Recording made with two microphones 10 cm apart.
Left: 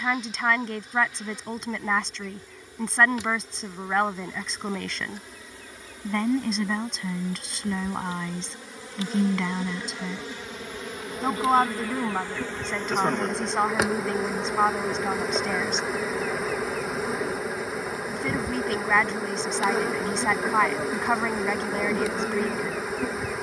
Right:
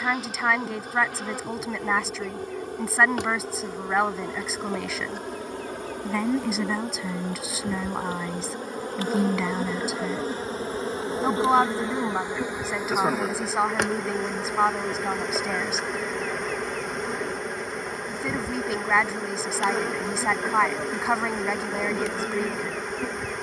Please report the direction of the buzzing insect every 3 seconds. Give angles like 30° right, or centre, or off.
60° right, 60° right, 50° right, 30° right, centre, centre, centre, centre.